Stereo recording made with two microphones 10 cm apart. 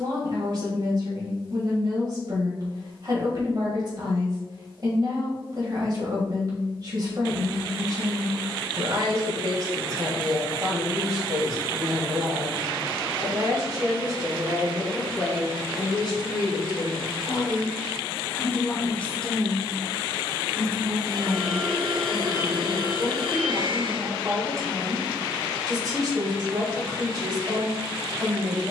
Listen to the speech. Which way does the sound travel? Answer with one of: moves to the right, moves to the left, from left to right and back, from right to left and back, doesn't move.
from right to left and back.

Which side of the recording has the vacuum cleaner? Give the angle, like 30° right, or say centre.
70° right.